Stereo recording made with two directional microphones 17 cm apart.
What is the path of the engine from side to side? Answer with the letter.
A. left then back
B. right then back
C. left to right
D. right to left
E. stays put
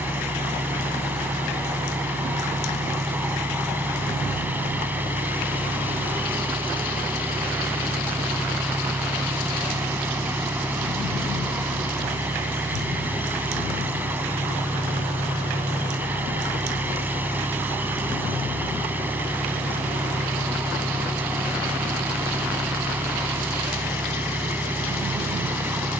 E.